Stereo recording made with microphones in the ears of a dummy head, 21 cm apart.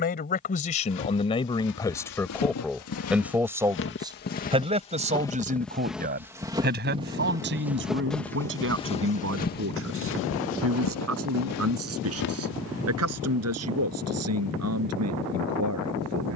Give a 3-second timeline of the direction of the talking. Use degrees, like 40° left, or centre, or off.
20° left, 20° right, 50° right, 60° right, 60° right, 70° right.